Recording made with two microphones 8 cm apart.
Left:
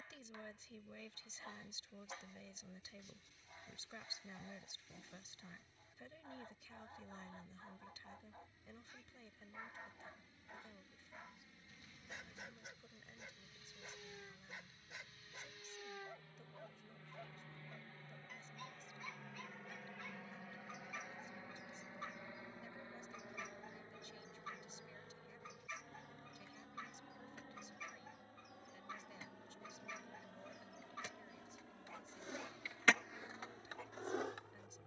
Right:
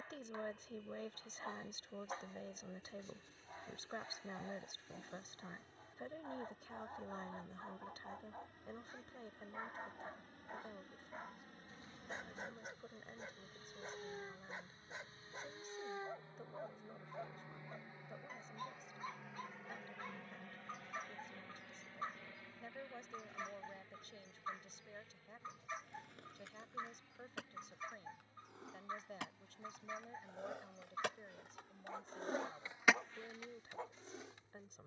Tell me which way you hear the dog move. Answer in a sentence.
You can hear the dog stay in one place.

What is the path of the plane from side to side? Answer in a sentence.
You can hear the plane travel towards the left.